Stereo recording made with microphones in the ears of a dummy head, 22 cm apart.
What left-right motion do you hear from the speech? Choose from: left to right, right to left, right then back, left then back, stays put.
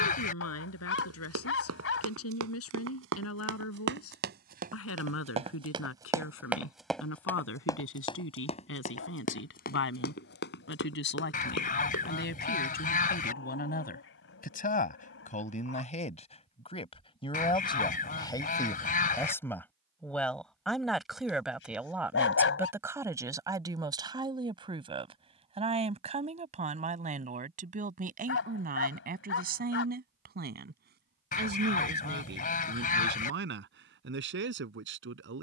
left to right.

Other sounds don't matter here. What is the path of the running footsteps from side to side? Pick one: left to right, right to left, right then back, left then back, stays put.
right to left.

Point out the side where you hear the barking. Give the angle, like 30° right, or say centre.
60° left.